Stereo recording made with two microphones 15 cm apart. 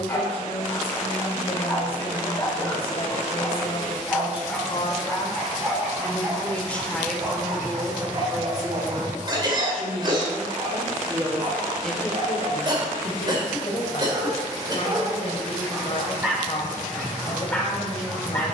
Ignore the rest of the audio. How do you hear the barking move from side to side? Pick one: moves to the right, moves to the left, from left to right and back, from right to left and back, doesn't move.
from left to right and back.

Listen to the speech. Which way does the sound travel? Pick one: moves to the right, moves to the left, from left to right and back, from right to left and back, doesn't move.
from left to right and back.